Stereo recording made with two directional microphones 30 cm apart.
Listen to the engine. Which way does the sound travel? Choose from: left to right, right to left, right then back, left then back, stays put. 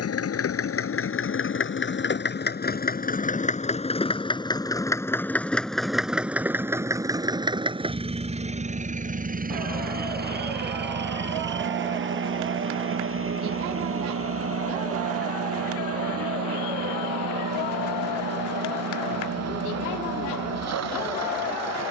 left to right.